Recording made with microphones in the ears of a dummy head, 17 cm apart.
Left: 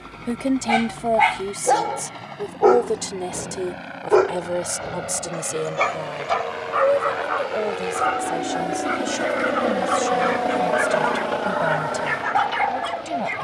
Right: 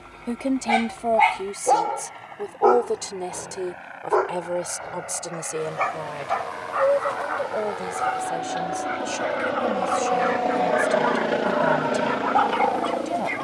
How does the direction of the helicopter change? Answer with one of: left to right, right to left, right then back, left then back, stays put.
left to right.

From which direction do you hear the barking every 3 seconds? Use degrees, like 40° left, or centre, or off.
centre, 30° left, 50° left, 40° left, 10° left.